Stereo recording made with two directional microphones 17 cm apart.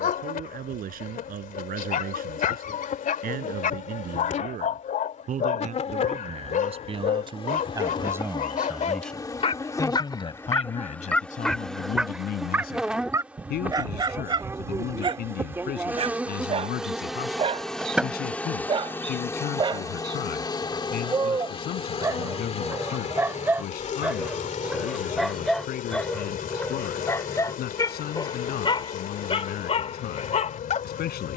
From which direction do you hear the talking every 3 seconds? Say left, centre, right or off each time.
right, right, right, left, left, left, left, left, left, left, left.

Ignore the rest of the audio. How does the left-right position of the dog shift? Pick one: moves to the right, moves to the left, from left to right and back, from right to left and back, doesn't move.
from left to right and back.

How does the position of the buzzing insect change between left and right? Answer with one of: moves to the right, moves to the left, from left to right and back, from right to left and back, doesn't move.
from left to right and back.